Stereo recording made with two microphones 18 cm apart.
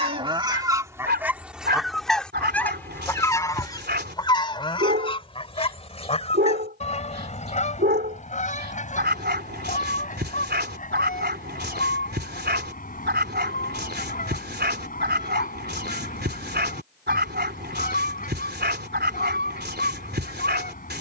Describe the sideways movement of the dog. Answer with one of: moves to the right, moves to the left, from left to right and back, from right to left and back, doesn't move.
doesn't move.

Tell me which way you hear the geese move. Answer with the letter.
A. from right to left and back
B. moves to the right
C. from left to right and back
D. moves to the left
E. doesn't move
D.